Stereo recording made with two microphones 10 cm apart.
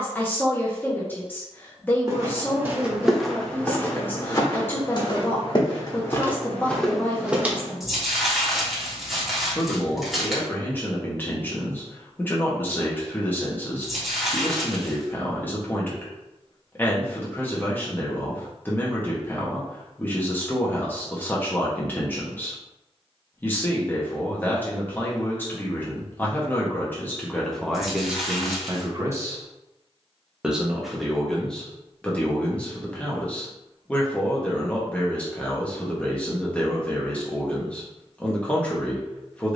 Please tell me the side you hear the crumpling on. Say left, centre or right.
centre.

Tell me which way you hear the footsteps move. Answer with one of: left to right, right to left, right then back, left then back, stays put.
left then back.